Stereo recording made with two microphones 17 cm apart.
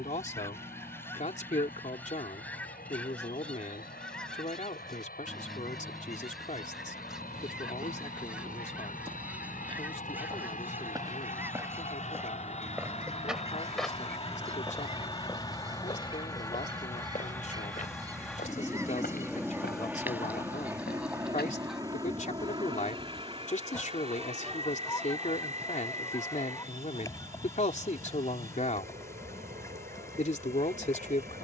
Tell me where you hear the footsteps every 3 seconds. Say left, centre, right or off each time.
off, off, right, right, centre, left, left, left, off, off, off.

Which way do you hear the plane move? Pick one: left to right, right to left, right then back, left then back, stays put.
left to right.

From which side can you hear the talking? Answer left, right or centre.
left.